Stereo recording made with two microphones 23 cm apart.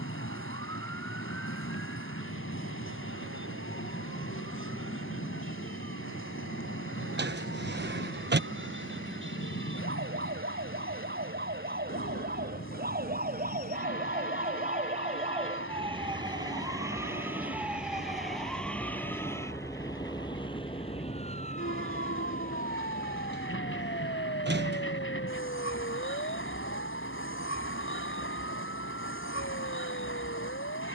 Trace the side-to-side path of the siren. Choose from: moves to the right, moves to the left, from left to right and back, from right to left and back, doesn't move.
moves to the left.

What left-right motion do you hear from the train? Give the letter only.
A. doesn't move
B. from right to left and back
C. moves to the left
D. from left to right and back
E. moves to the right
A.